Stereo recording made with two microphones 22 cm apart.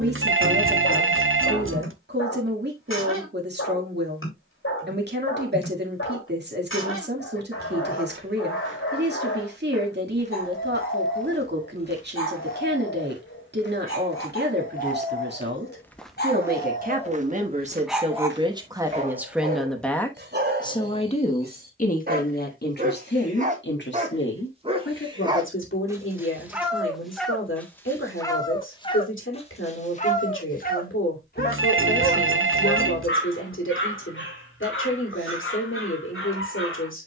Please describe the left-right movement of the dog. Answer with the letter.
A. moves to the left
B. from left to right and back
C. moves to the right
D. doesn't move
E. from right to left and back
B.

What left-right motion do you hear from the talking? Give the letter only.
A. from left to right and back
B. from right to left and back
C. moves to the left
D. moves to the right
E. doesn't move
C.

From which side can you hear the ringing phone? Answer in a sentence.
In this clip you hear the ringing phone on the right.